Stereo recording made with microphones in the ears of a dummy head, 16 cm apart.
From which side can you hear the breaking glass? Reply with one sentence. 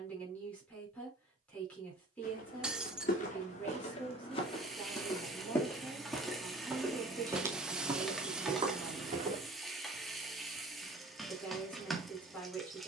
In this clip you hear the breaking glass in the centre.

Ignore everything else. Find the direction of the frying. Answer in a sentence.
In this clip you hear the frying in the centre.